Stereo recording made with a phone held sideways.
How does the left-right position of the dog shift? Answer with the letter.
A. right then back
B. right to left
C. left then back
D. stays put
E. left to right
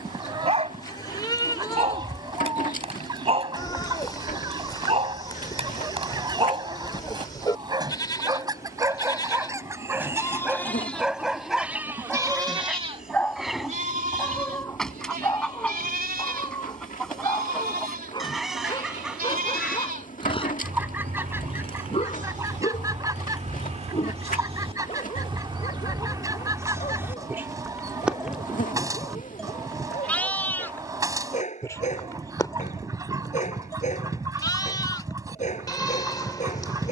B.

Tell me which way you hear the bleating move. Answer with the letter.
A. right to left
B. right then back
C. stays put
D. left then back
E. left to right
B.